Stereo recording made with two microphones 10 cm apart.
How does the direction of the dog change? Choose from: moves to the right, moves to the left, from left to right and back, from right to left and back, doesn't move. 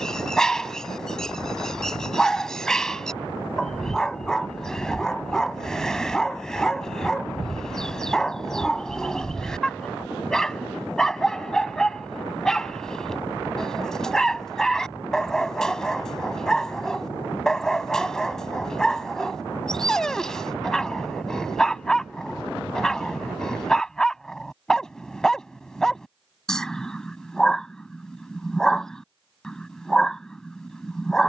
doesn't move.